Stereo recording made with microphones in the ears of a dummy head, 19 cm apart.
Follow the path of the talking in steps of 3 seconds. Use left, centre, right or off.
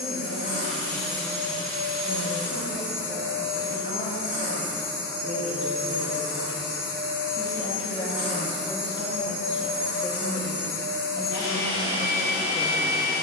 left, left, left, centre, centre.